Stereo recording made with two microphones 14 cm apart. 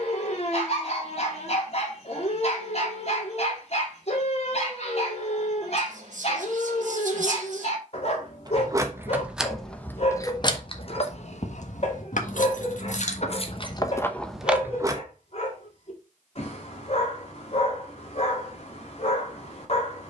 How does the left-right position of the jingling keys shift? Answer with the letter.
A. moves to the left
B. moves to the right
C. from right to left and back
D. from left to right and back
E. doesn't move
C.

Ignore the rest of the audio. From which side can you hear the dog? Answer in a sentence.
In this clip you hear the dog on the left.